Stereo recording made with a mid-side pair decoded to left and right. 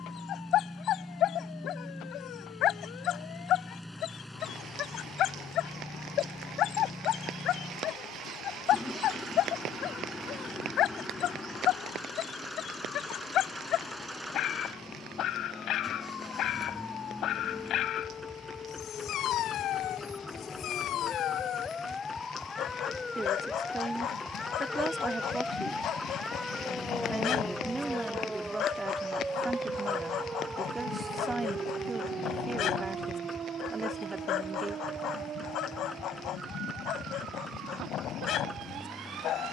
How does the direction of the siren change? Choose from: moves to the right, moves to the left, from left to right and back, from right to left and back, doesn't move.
moves to the right.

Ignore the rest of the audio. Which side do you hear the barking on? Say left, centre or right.
left.